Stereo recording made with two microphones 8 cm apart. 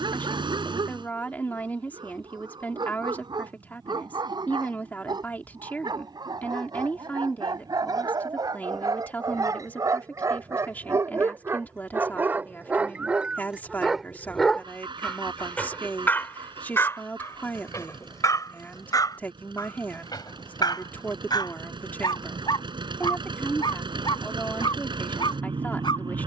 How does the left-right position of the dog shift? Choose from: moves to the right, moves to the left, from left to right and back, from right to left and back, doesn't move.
moves to the left.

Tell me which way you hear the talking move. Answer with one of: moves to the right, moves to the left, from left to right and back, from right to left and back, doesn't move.
doesn't move.